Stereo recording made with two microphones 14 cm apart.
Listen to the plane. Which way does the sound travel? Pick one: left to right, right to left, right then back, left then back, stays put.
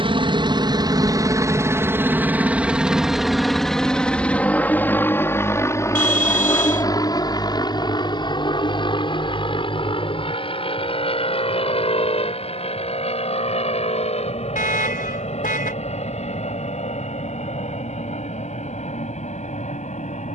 right to left.